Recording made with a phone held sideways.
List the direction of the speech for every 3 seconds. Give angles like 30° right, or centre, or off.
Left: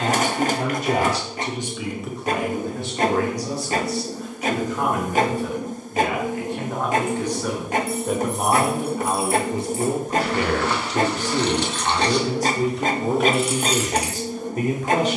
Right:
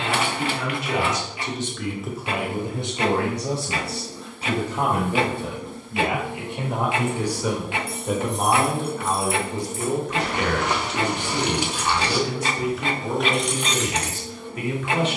20° left, 30° right, 10° right, 30° left, 40° left.